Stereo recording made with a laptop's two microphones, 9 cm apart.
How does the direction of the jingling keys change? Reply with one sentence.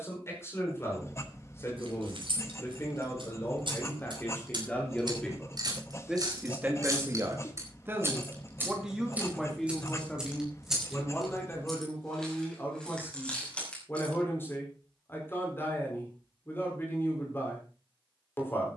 You can hear the jingling keys move from right to left.